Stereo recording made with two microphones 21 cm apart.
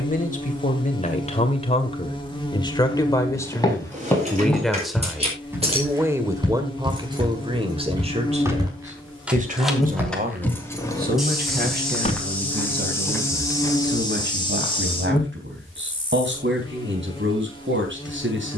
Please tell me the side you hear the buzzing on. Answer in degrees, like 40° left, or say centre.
20° left.